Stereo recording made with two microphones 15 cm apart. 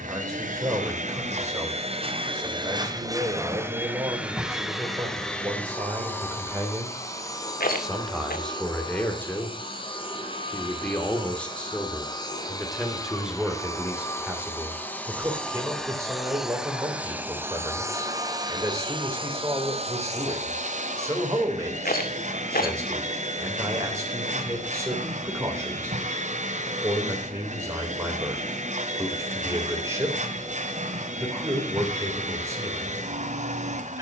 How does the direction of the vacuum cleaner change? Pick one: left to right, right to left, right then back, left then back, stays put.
left then back.